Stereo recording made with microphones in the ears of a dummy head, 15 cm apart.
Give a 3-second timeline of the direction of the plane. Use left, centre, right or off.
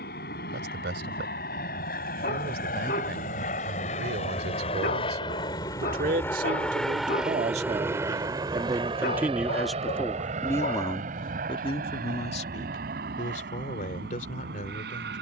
left, left, centre, right, right.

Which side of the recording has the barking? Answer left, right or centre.
left.